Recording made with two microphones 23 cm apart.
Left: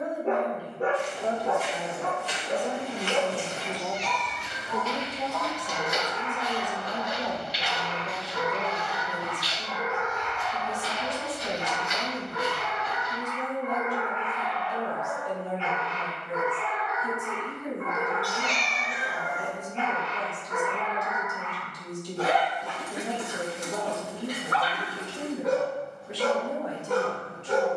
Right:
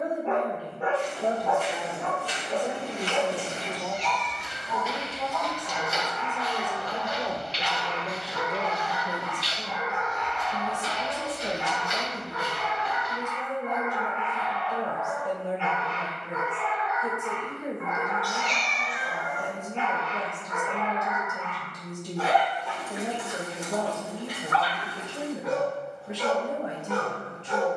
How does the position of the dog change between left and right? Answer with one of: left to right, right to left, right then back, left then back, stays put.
stays put.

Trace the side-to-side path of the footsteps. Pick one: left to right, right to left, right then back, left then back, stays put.
left then back.